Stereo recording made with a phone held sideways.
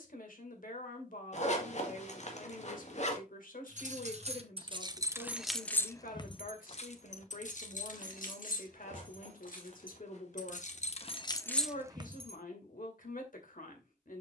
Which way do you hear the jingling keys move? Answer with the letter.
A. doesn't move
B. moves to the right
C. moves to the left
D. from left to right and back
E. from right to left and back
E.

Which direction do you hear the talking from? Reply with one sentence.
You can hear the talking on the left.